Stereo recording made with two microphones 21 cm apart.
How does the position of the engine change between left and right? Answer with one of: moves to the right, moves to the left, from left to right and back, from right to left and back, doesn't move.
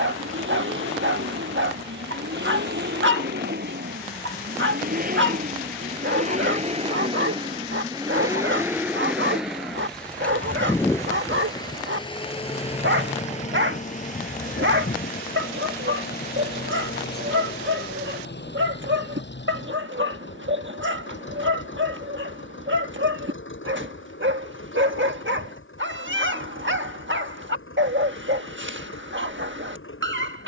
moves to the left.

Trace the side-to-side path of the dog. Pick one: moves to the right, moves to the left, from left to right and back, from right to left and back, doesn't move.
doesn't move.